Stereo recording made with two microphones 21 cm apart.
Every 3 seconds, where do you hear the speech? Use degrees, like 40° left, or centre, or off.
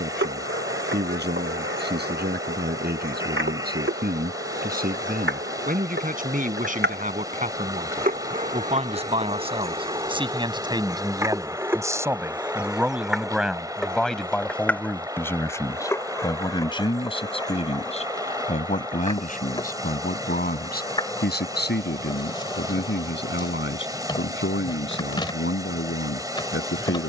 50° right, 40° right, 40° right, 20° right, centre, 20° left, 40° left, 50° left, 60° left.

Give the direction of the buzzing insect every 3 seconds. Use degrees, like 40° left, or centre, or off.
70° right, 70° right, 50° right, 20° right, centre, 10° left, 20° left, 20° left, 20° left.